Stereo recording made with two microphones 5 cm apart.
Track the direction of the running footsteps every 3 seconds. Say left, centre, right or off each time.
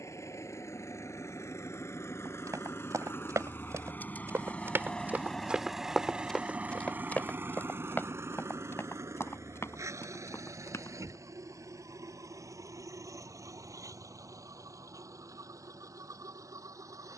right, right, left, left, off, off.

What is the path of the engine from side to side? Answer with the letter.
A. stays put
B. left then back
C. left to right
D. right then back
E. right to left
C.